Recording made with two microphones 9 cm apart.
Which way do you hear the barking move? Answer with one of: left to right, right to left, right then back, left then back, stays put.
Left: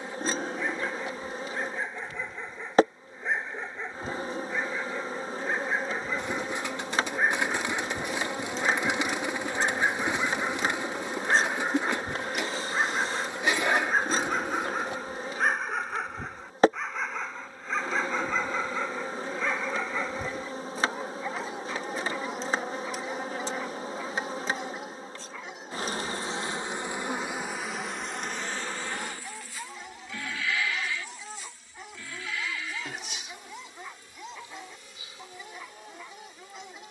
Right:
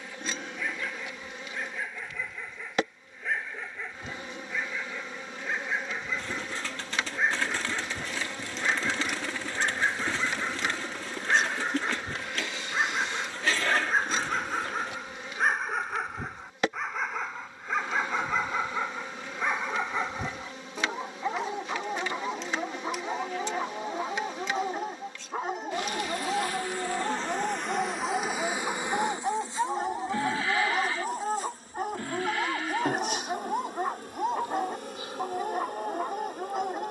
left to right.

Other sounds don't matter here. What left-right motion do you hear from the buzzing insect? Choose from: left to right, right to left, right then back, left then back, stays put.
left to right.